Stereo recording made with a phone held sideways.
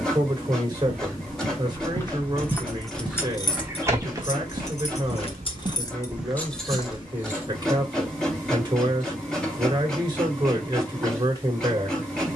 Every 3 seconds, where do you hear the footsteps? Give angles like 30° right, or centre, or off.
20° left, 20° right, 10° left, off.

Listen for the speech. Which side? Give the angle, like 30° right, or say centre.
30° right.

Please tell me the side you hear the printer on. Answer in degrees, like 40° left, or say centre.
centre.